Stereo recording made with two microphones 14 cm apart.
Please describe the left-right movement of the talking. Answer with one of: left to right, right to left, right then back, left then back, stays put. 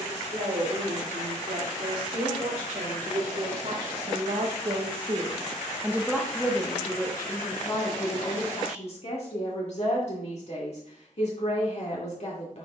right to left.